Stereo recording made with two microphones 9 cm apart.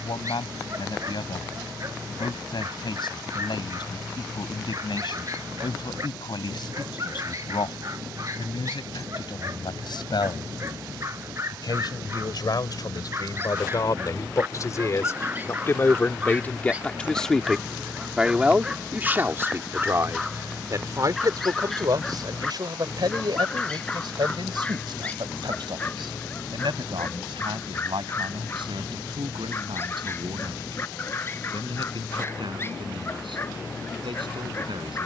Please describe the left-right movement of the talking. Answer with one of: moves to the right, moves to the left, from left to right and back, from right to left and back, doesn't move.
moves to the right.